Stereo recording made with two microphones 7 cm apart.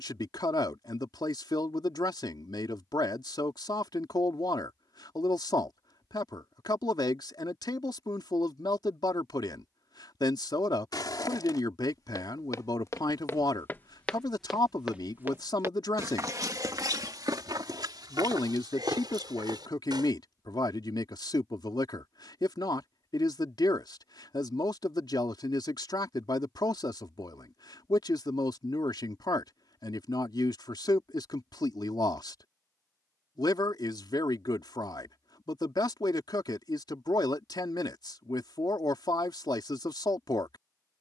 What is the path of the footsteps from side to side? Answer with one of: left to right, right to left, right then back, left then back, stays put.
left to right.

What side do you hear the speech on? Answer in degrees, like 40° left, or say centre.
70° left.